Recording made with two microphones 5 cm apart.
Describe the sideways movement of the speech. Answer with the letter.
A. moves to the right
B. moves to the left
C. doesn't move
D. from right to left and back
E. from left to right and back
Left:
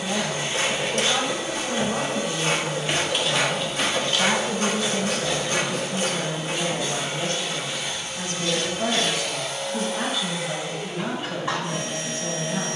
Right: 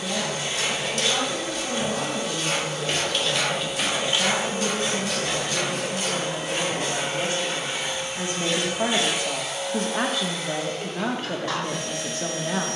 A.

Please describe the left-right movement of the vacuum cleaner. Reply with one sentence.
In this clip you hear the vacuum cleaner move from left to right and back again.